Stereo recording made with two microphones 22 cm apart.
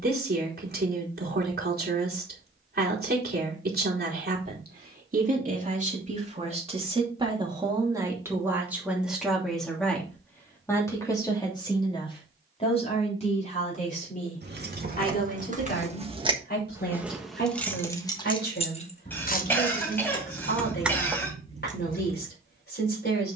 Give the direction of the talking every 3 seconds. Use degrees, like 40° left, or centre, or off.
50° right, 40° right, 20° right, 10° left, 30° left, 50° left, 50° left, 50° left.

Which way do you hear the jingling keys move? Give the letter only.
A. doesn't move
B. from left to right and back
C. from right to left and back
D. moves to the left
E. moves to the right
C.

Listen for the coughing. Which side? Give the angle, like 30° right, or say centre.
10° left.